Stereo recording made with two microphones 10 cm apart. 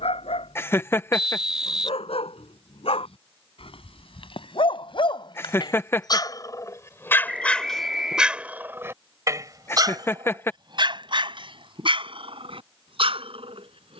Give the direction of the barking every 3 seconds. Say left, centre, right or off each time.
left, left, centre, right, right.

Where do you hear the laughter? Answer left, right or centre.
left.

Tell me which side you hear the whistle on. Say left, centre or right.
centre.